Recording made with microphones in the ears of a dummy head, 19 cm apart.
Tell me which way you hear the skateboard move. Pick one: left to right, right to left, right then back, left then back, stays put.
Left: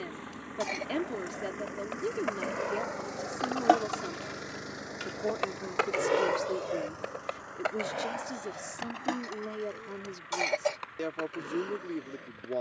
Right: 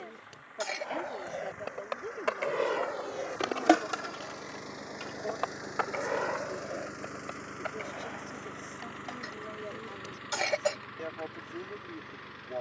right to left.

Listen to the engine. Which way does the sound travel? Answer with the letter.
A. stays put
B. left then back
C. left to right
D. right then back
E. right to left
C.